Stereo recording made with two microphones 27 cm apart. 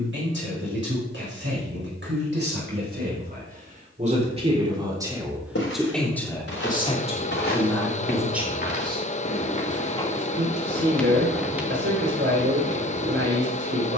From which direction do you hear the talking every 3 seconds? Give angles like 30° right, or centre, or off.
50° right, 20° right, 10° left, 40° right, 50° right.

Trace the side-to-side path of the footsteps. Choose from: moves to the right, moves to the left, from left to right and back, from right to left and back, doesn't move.
moves to the right.